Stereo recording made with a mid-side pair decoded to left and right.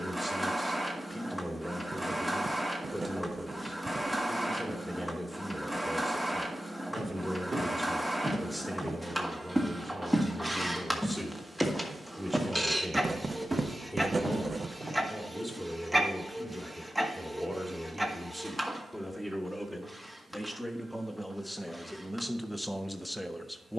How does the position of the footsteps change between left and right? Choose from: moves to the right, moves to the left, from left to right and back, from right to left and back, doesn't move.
from right to left and back.